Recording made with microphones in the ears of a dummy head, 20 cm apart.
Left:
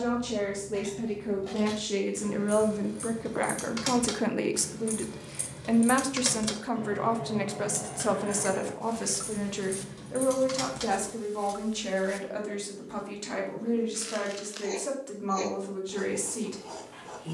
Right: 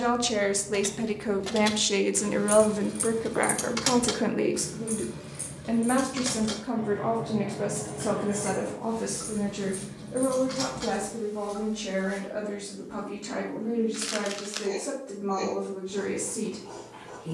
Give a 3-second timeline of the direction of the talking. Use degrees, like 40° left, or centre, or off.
40° right, 10° left, 50° left, 70° left, 70° left, 80° left.